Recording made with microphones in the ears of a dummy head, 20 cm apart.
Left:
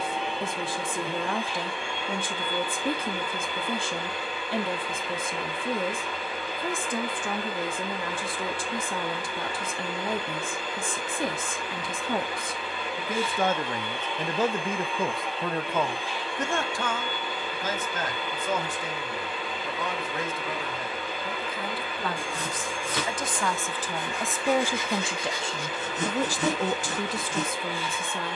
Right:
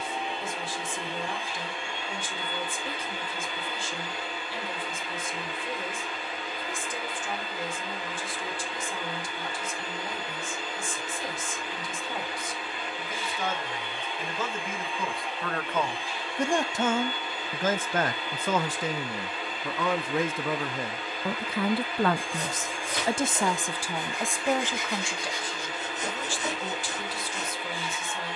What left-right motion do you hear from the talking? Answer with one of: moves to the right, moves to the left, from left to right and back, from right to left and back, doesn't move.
from left to right and back.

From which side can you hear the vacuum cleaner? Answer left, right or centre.
left.